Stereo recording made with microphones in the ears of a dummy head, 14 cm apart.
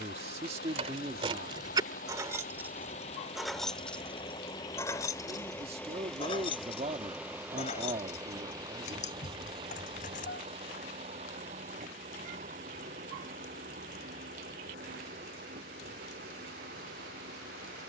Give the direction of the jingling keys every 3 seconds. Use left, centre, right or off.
right, centre, left, left, off, off.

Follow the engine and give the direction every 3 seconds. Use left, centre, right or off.
left, left, centre, right, right, right.